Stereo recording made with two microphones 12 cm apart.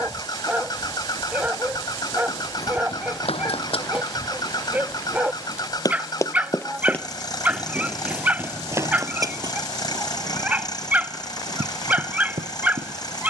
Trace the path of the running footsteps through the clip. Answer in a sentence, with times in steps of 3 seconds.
You can hear the running footsteps on the left from 0 s, in the centre from 6 s and on the right from 9 s.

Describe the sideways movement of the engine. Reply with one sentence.
In this clip you hear the engine stay in one place.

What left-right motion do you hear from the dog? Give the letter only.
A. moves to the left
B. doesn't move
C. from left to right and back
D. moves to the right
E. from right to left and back
B.